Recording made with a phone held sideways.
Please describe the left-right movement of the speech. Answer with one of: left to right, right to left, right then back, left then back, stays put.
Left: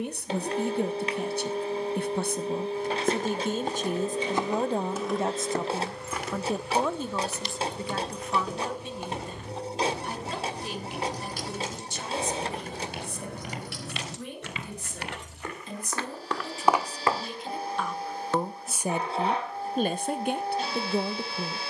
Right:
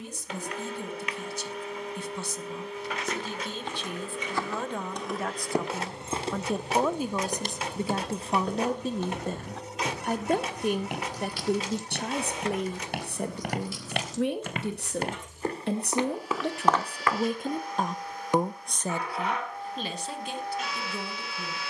right then back.